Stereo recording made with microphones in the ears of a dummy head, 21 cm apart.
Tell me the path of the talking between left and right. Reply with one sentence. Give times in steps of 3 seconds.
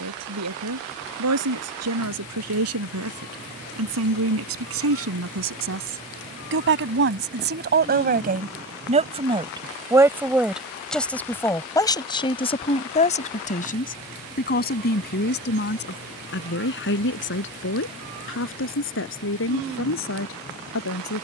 You can hear the talking on the right from 0 s, in the centre from 9 s and on the left from 12 s.